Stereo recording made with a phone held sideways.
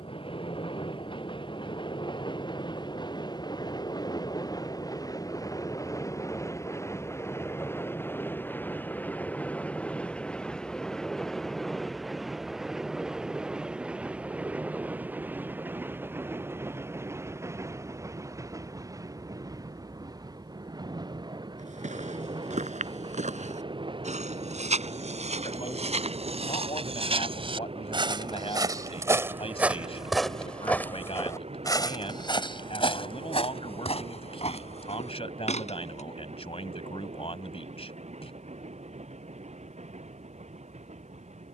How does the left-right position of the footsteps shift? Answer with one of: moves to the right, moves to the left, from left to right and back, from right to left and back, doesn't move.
moves to the left.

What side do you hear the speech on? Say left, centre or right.
left.